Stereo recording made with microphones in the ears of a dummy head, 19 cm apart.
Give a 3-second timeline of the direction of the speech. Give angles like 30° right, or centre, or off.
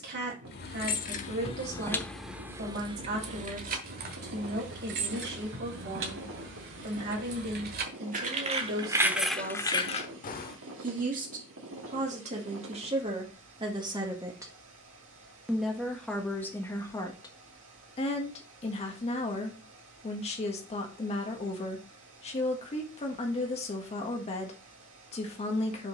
50° right, 50° right, 50° right, 40° right, 30° right, 10° left, 30° left, 30° left, 30° left.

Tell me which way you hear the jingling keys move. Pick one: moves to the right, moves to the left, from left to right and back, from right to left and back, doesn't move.
from left to right and back.